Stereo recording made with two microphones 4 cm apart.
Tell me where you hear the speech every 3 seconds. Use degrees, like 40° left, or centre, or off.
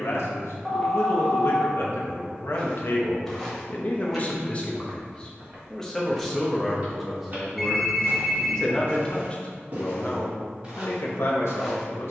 70° left, 30° left, centre, 60° left.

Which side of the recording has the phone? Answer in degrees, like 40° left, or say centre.
centre.